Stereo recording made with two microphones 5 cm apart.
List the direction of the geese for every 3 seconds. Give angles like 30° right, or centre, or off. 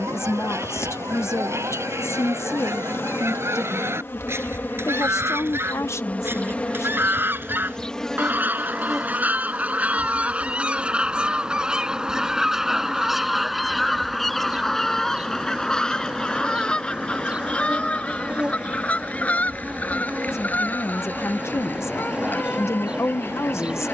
70° right, 60° right, 40° right, 30° right, centre, 20° left, 30° left, 40° left.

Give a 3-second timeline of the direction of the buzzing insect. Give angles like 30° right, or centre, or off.
70° left, 50° left, 20° left, 10° right, 20° right, 20° right, 20° right, 20° right.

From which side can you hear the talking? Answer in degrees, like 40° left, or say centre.
70° left.